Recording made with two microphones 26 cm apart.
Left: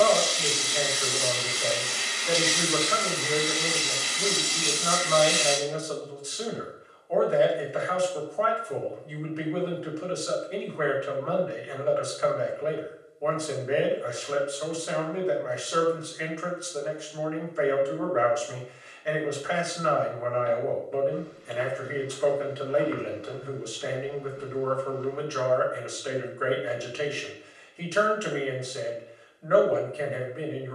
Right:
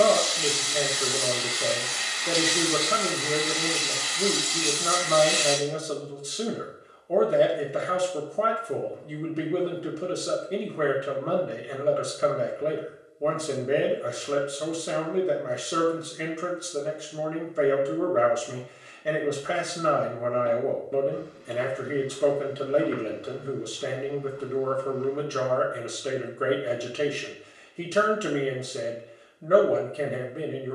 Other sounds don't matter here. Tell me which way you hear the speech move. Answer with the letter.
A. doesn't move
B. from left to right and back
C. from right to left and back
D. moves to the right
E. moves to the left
A.